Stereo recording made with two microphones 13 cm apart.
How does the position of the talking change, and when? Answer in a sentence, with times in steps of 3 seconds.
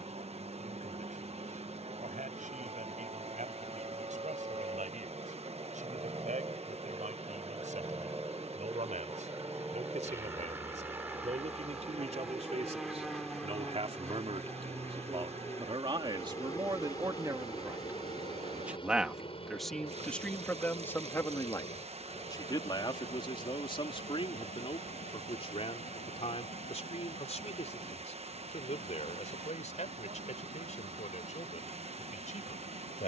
You can hear the talking on the right from 0 s, in the centre from 18 s and on the left from 21 s.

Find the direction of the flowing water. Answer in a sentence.
In this clip you hear the flowing water on the right.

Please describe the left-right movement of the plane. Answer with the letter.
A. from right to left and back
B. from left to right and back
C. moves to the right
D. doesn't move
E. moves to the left
E.